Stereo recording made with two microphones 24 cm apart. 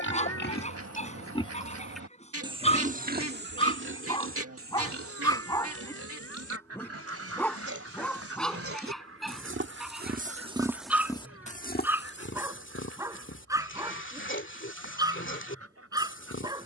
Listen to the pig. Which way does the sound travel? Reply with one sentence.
In this clip you hear the pig go right and come back.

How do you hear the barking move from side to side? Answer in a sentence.
In this clip you hear the barking move to the right.